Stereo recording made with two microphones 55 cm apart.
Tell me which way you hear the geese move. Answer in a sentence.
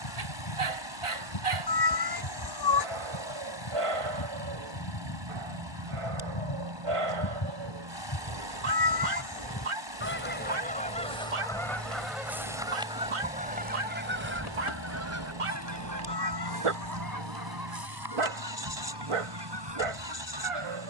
You can hear the geese move from left to right.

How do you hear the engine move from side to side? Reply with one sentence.
You can hear the engine stay put.